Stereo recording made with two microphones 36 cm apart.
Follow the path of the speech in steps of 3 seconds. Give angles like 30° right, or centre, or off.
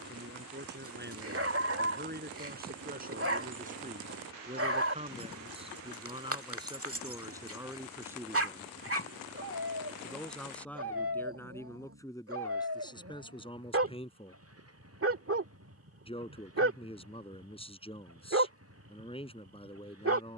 30° right, 20° right, 10° right, centre, 10° left, 20° left, 20° left.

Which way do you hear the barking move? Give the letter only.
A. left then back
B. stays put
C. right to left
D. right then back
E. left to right
B.